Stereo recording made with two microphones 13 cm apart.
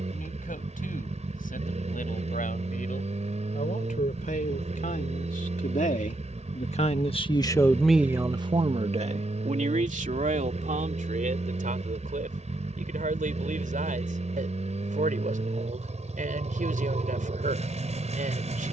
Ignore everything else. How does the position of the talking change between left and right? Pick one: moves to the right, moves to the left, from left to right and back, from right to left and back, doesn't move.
moves to the right.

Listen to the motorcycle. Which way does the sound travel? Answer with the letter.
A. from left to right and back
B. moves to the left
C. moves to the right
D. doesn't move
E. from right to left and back
D.